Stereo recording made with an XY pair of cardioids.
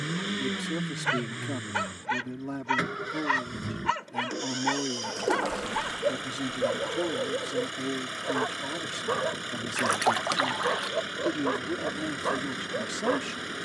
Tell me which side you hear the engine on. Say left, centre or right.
centre.